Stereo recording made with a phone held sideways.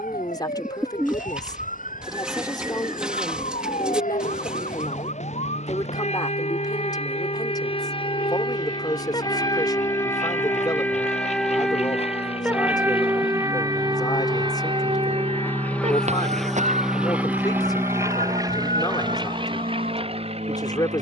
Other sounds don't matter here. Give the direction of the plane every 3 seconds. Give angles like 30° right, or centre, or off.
70° left, 70° left, 60° left, 50° left, 30° left, centre, 30° right.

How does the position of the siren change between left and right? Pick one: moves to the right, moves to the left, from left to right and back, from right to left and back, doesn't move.
moves to the right.